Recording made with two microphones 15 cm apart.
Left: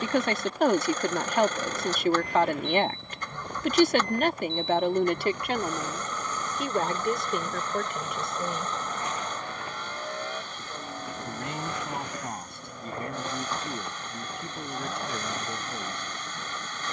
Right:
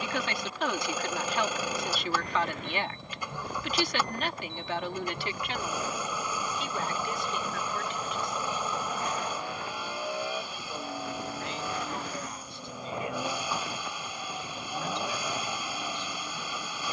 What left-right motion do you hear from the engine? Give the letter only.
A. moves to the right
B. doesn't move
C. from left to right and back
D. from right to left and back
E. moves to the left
B.